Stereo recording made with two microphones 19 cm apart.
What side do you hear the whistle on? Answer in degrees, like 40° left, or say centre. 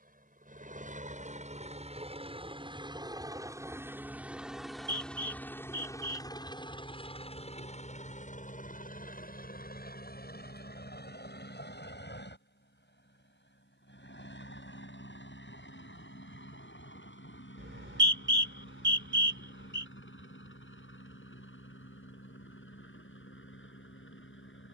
80° right.